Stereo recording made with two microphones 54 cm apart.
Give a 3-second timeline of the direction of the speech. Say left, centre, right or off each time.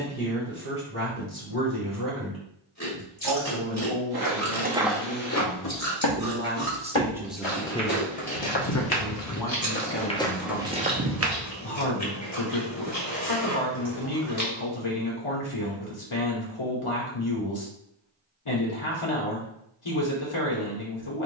right, right, centre, left, left, left, left.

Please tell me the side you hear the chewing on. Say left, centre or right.
left.